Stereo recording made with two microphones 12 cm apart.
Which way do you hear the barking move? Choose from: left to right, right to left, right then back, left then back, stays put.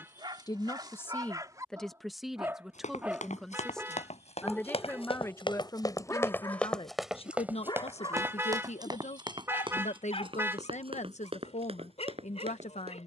right to left.